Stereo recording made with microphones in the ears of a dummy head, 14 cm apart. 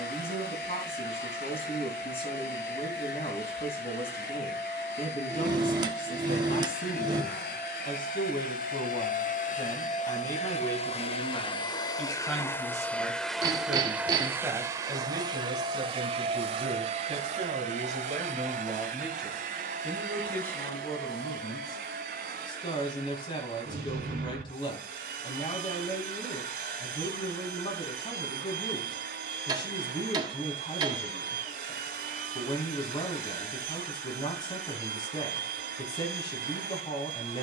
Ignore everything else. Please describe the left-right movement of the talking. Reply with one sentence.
In this clip you hear the talking go right and come back.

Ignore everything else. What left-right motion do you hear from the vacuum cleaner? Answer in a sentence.
In this clip you hear the vacuum cleaner move to the right.